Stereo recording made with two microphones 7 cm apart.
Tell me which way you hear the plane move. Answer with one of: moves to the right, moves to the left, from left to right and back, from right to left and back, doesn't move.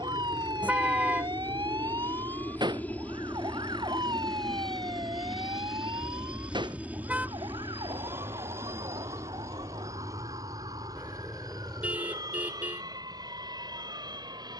moves to the right.